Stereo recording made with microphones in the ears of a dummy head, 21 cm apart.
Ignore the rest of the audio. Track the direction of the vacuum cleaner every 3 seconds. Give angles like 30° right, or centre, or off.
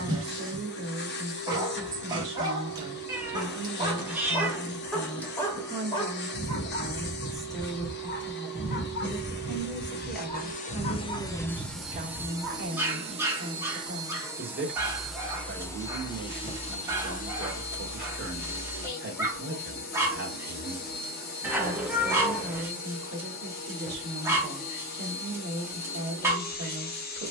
50° left, 50° left, 50° left, 30° left, 20° right, 20° left, 40° left, 40° left, 40° left.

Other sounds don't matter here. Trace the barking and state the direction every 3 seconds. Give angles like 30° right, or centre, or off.
20° right, centre, 40° left, 20° left, 10° right, 10° right, 10° right, 10° right, 10° right.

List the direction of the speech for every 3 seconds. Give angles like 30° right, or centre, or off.
40° right, 20° right, centre, 10° right, 40° right, 40° right, 40° right, 40° right, 40° right.